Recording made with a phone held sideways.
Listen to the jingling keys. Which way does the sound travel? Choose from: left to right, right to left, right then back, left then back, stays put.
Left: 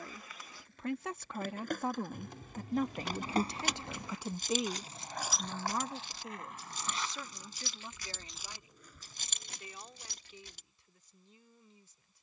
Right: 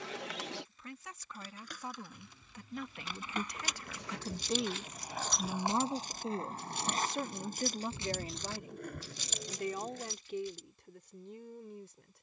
right then back.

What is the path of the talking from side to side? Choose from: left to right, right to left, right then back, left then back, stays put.
left to right.